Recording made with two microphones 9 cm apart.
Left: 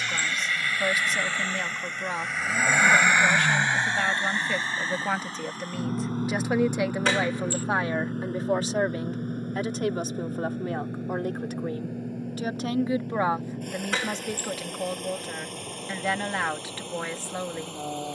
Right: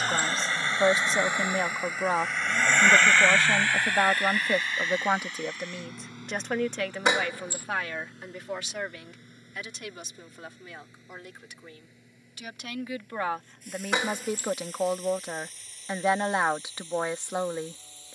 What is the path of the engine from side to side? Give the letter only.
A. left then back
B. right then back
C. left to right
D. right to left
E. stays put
D.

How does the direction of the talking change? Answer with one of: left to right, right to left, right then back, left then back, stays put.
left then back.